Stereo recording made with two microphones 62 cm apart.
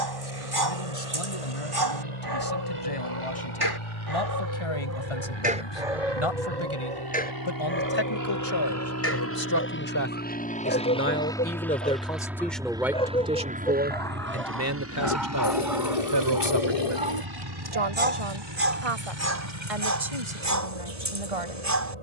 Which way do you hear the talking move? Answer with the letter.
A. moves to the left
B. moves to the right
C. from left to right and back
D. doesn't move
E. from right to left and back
B.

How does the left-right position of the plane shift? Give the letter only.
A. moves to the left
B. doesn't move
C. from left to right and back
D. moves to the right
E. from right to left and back
D.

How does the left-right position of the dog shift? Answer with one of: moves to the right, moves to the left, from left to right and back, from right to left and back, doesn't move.
from right to left and back.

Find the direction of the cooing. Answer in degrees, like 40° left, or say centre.
60° left.